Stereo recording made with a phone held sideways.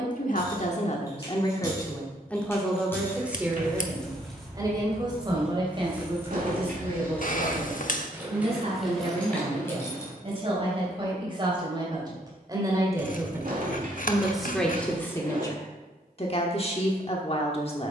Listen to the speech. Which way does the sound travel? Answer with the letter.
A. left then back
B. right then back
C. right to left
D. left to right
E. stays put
B.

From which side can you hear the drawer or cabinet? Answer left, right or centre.
right.